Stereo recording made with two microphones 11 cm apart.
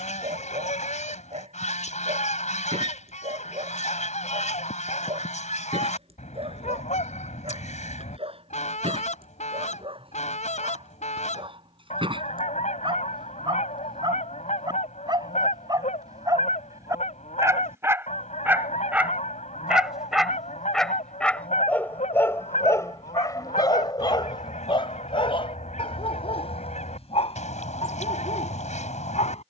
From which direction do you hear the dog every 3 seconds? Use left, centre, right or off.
right, right, right, right, right, right, centre, left, left, left.